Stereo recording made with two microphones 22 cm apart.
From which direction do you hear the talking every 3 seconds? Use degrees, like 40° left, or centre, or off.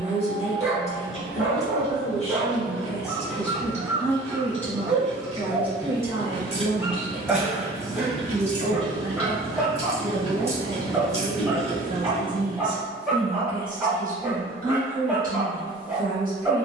30° left, 10° left, 30° right, 40° right, 40° right, 40° right.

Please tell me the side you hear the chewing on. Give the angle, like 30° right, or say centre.
30° left.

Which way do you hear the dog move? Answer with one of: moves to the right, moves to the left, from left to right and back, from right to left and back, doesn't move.
doesn't move.